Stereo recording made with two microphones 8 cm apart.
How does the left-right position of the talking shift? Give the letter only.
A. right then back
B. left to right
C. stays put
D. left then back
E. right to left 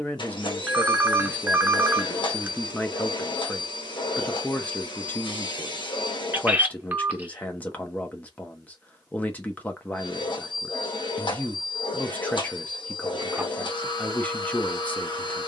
C.